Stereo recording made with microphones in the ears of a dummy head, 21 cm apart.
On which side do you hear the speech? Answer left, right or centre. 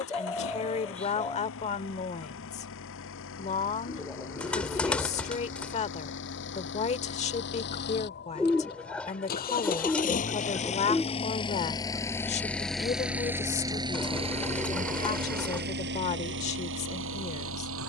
left.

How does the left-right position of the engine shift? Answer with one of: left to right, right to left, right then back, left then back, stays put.
left to right.